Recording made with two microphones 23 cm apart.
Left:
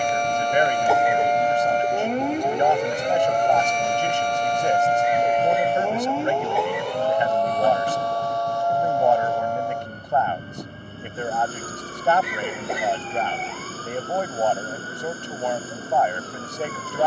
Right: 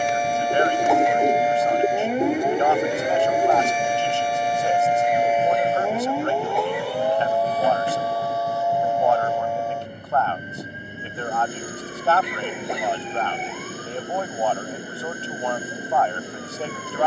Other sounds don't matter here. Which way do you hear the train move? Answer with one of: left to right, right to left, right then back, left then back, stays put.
stays put.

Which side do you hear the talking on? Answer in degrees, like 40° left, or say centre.
20° left.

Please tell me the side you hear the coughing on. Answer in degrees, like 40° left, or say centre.
centre.